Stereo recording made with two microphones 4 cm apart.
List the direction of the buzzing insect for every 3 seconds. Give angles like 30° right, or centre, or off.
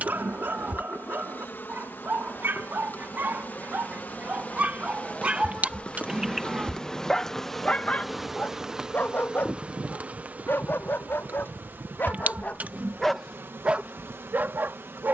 60° left, 40° left, 10° left, 40° right, 70° right.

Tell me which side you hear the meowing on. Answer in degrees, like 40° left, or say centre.
40° right.